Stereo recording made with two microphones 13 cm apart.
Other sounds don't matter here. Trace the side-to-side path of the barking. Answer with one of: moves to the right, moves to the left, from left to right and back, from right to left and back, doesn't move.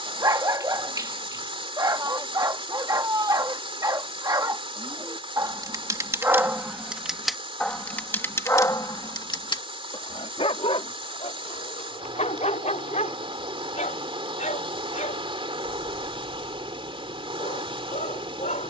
moves to the left.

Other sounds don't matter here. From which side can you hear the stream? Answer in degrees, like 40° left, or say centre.
40° right.